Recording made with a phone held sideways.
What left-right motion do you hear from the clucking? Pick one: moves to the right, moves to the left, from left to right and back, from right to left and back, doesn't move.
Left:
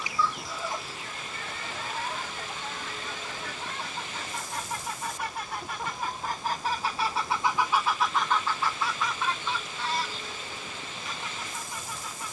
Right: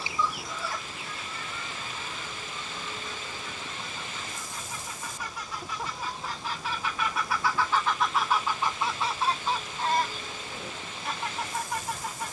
from right to left and back.